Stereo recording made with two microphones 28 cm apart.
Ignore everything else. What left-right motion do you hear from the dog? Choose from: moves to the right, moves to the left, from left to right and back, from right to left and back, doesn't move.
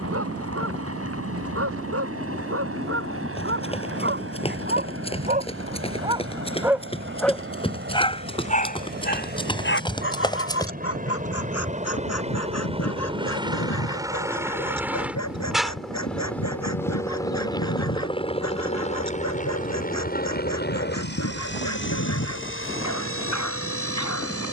moves to the left.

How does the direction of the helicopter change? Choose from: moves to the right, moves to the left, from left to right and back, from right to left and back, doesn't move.
moves to the left.